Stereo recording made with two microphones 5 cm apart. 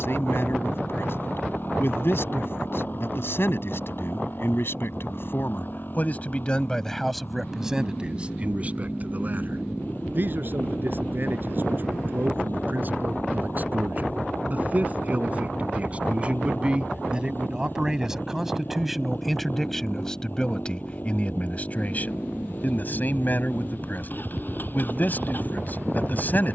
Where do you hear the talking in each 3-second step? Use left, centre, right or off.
left, left, centre, right, right, right, centre, left, left.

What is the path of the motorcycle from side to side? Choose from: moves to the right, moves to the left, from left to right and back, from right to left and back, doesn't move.
doesn't move.